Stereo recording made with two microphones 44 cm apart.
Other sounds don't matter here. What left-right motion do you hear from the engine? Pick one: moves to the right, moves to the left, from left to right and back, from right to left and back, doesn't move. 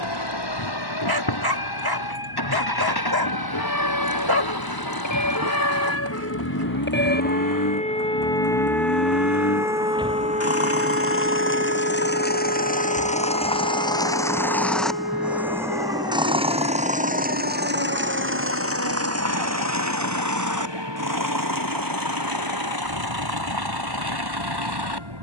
moves to the right.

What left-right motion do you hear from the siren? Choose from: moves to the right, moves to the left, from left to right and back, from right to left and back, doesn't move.
moves to the right.